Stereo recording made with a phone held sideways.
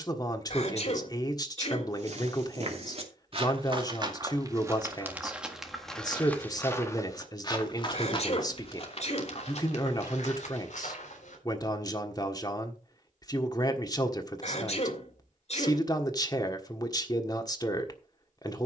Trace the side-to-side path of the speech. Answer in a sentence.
You can hear the speech stay put.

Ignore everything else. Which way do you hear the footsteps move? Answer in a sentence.
You can hear the footsteps go from the right side to the left.